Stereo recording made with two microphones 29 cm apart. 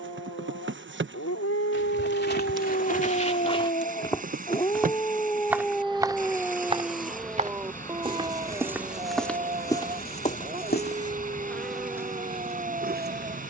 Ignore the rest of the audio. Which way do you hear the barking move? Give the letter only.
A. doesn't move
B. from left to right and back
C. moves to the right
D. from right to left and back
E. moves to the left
C.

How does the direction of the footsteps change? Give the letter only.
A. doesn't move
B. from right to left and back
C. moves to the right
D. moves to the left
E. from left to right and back
E.